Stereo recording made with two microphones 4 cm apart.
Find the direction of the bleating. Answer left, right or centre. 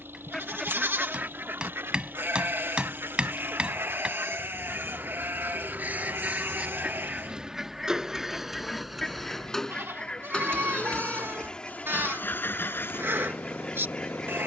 right.